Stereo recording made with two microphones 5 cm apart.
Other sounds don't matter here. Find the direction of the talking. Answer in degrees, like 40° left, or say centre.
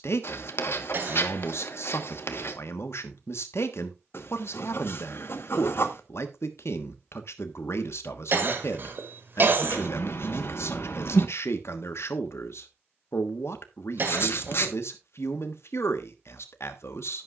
60° left.